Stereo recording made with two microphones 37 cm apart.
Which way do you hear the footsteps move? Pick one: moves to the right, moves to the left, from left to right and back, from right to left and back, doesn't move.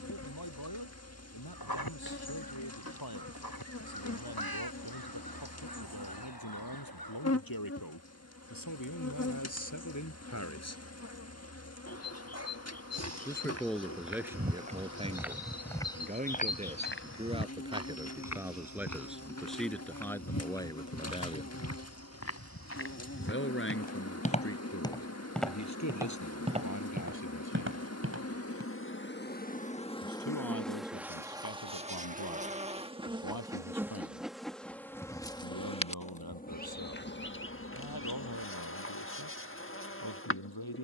from right to left and back.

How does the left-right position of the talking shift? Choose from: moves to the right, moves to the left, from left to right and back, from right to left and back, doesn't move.
from left to right and back.